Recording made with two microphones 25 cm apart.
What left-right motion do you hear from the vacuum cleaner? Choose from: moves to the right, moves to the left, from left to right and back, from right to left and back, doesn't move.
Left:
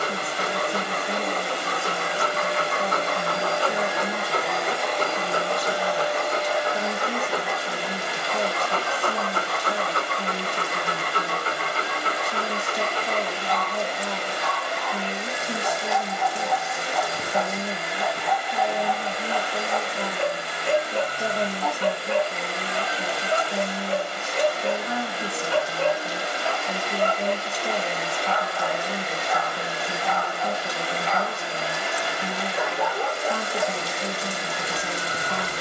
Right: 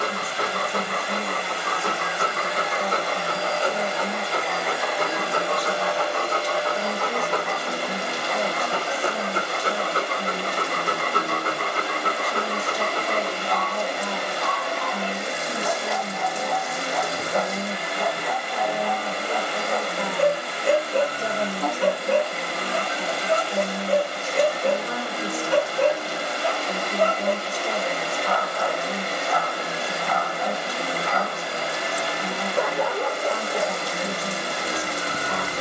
moves to the right.